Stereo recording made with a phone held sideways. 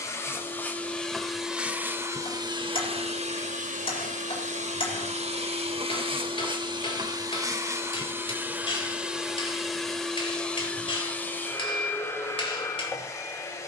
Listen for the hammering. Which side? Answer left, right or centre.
left.